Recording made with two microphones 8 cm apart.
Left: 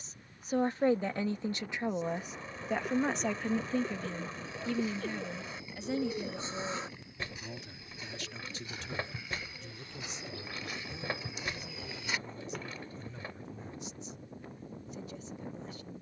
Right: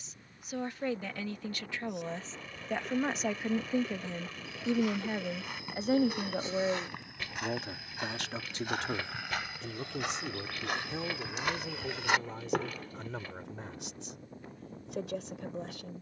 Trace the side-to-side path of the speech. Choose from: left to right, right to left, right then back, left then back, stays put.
left to right.